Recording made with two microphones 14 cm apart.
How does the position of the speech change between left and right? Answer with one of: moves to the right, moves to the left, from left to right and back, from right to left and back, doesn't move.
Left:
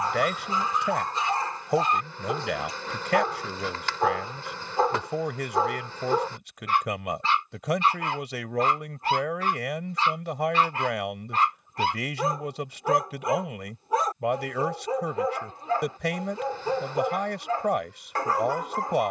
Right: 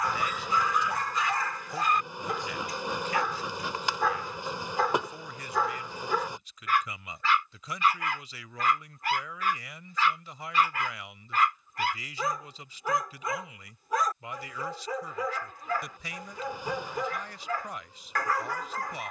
doesn't move.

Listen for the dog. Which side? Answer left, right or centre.
left.